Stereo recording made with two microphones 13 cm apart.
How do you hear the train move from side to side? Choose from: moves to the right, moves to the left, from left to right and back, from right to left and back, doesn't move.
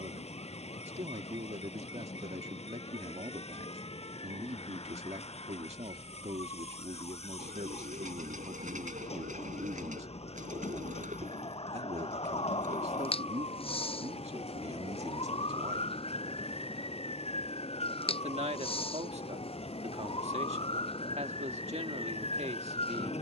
doesn't move.